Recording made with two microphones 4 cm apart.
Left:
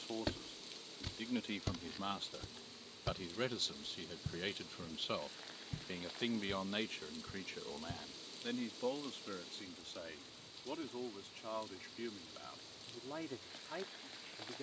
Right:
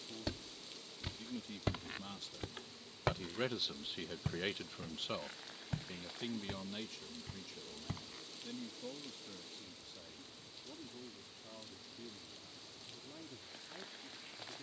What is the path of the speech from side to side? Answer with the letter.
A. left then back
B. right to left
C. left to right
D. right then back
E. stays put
D.